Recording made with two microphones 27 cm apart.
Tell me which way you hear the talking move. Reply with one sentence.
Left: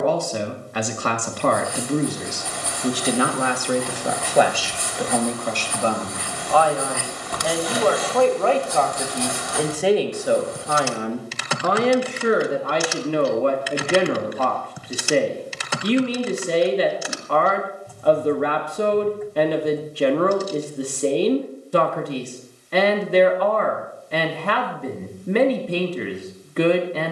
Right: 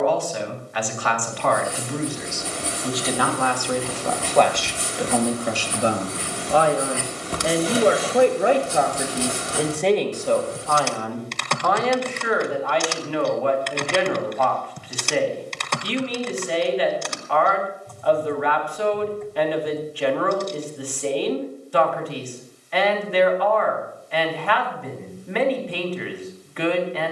You can hear the talking move from left to right and back again.